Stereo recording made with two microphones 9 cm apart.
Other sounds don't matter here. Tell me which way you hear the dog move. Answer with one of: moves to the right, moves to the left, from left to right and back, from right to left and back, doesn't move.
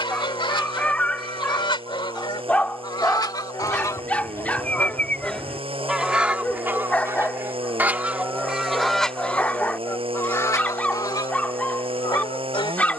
doesn't move.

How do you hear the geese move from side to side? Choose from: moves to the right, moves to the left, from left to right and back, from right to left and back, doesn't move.
from left to right and back.